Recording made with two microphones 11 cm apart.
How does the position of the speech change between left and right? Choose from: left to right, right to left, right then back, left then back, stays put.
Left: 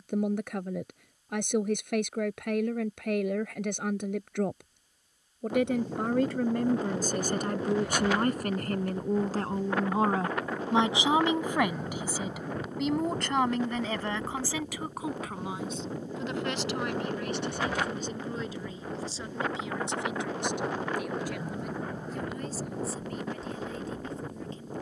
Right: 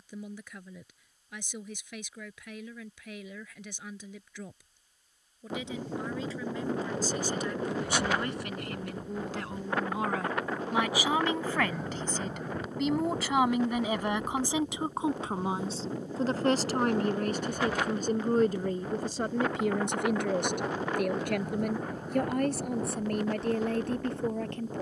left to right.